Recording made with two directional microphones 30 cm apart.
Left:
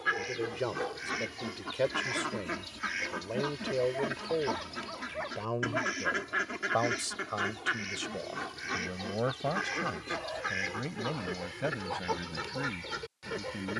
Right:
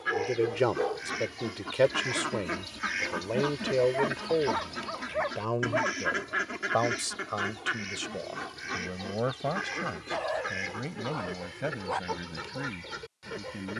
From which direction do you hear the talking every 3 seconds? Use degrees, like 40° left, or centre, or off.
50° right, 30° right, 10° right, centre, centre.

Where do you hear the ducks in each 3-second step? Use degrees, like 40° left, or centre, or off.
centre, 10° right, centre, 10° left, 20° left.